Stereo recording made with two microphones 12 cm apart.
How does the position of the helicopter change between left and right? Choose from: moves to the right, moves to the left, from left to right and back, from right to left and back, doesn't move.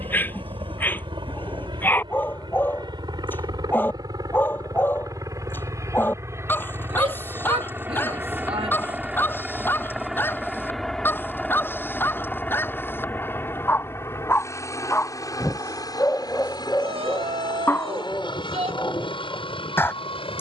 moves to the left.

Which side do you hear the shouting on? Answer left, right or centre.
right.